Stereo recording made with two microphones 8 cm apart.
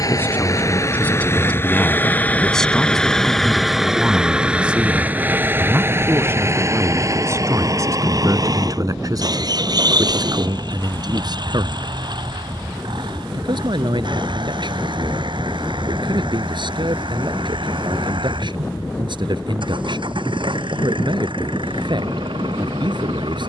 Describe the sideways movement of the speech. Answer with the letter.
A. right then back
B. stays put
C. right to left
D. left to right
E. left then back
D.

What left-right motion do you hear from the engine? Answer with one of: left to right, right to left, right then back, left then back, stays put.
left to right.